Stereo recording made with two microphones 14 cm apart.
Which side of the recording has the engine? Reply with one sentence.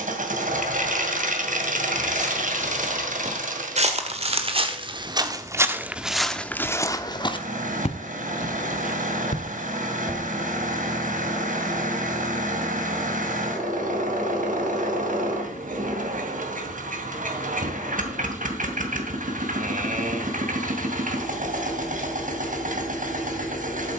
You can hear the engine on the right.